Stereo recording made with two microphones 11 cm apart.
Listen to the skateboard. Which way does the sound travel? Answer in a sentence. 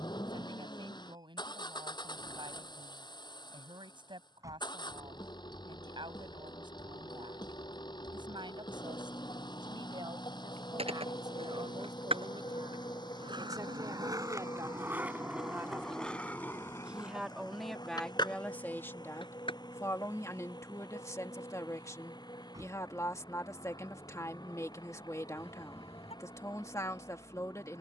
You can hear the skateboard go from the right side to the left.